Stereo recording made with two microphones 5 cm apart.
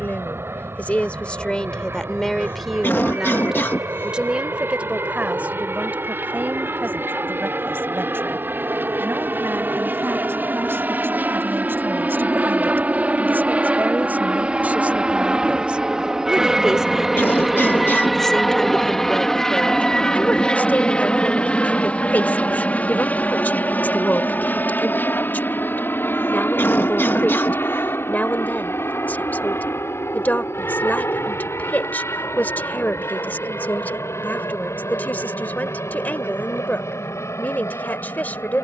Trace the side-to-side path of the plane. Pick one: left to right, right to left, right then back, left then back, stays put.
right to left.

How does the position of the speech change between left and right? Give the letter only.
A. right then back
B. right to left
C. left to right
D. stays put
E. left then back
A.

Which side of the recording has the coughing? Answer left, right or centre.
left.